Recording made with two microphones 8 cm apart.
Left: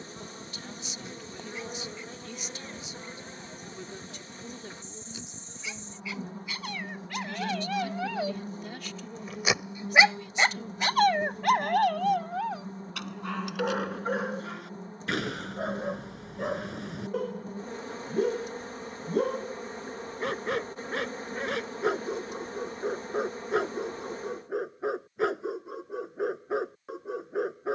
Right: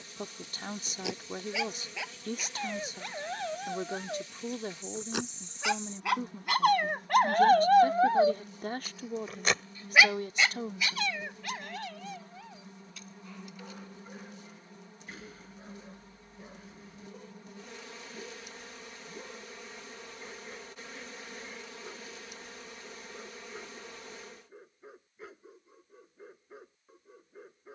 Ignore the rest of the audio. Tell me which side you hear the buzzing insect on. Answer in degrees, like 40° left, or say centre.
40° left.